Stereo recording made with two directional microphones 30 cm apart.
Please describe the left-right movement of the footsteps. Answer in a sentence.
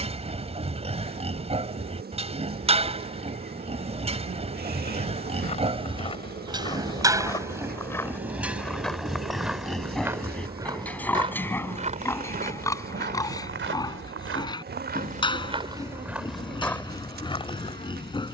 In this clip you hear the footsteps move from left to right and back again.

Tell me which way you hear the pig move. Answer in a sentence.
You can hear the pig move to the left.